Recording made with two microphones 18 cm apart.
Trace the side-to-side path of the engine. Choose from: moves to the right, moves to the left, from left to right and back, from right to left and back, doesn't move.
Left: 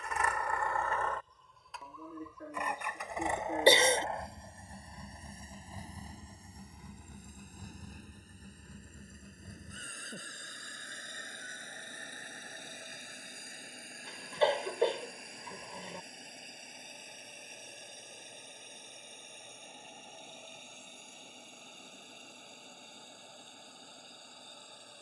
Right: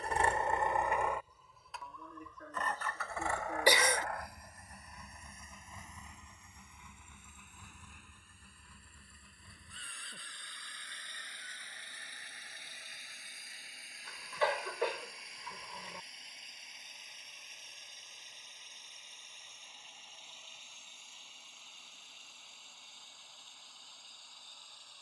moves to the left.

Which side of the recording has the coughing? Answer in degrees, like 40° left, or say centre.
30° left.